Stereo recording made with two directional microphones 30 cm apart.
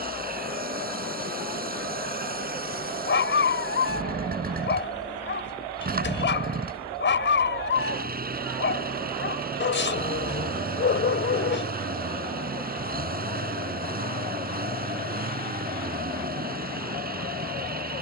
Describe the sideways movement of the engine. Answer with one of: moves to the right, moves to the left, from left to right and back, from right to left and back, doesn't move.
doesn't move.